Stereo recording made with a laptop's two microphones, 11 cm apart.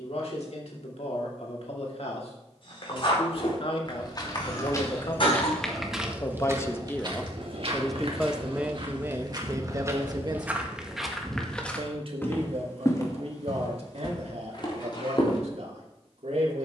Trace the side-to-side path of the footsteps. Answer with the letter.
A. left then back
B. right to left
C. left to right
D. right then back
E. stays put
D.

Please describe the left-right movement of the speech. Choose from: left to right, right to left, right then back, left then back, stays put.
left to right.